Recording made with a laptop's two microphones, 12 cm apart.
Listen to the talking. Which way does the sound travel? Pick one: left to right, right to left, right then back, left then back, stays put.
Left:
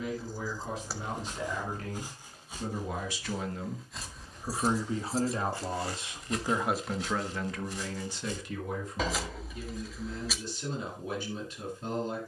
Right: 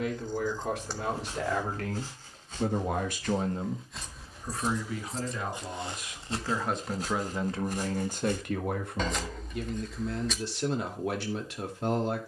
left then back.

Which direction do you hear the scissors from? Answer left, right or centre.
centre.